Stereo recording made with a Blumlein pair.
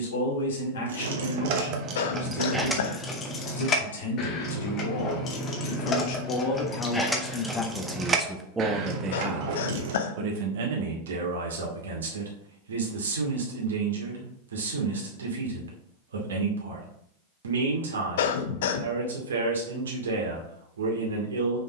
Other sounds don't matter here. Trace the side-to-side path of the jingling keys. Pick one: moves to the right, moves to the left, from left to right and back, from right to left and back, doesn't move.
from right to left and back.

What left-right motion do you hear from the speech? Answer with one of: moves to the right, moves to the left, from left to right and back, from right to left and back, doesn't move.
moves to the right.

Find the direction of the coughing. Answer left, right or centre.
left.